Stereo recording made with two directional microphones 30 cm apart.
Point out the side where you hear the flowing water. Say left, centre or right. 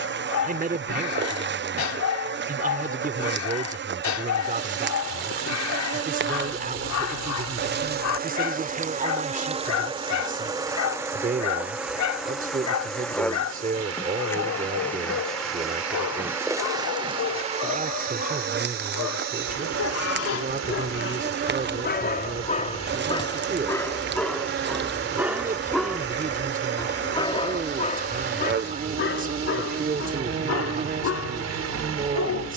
right.